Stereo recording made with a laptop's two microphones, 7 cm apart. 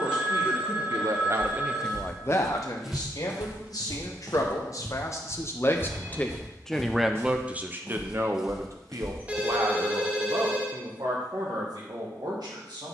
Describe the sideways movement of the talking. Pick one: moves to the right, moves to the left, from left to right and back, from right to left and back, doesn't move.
from right to left and back.